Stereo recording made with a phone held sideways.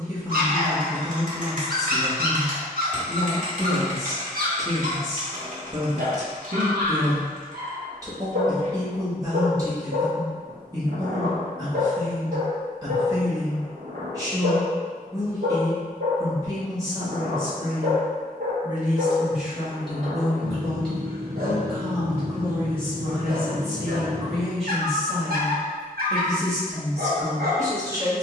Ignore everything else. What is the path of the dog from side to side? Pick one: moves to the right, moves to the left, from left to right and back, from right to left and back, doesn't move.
doesn't move.